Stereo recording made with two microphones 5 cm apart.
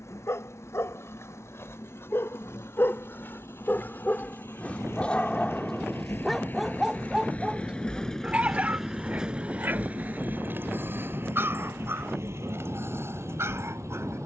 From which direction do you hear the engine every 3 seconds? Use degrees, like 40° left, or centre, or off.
70° left, 60° left, 20° left, 40° right, 70° right.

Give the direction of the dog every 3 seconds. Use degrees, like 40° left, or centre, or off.
60° left, 30° left, 10° right, 40° right, 50° right.